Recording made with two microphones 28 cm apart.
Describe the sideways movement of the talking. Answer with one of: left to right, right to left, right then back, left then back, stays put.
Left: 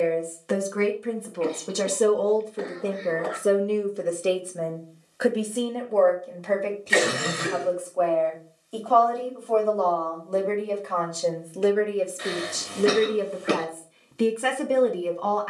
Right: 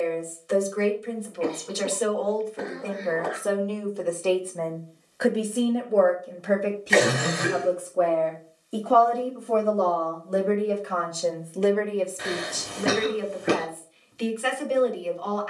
right then back.